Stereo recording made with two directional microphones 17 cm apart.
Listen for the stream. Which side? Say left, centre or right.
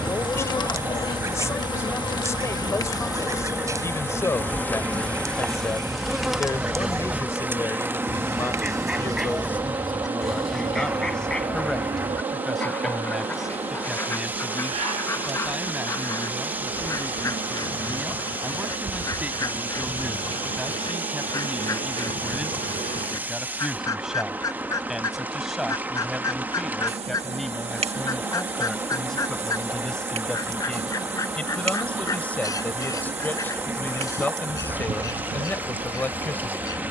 centre.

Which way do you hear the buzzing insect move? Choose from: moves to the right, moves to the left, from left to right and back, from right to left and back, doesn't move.
moves to the right.